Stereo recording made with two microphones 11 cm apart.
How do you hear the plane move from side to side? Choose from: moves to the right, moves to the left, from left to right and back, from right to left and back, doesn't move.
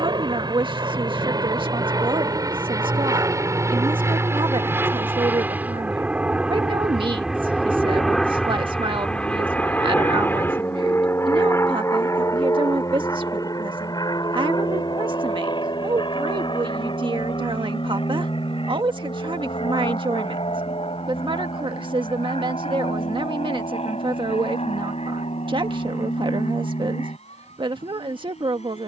moves to the left.